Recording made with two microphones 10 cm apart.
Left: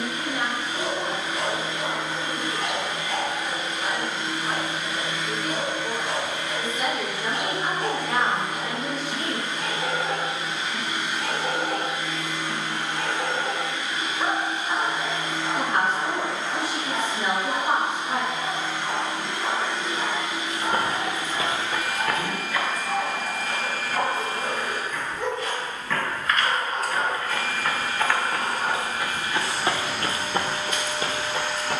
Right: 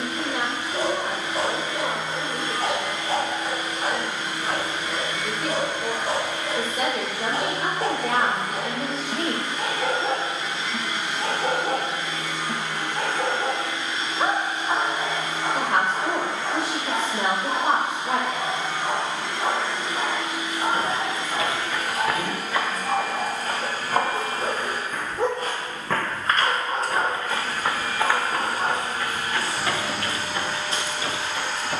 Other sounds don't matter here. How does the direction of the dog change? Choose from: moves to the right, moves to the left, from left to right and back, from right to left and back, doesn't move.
doesn't move.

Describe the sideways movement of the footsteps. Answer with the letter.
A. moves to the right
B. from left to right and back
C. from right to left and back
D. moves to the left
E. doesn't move
B.